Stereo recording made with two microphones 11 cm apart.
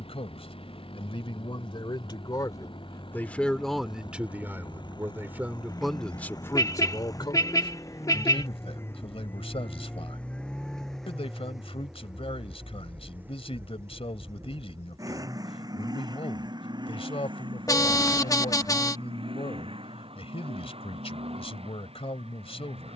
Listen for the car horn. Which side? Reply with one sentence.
In this clip you hear the car horn on the left.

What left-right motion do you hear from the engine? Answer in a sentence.
In this clip you hear the engine move from left to right.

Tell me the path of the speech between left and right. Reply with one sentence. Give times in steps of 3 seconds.
You can hear the speech on the left from 0 s, in the centre from 3 s and on the left from 6 s.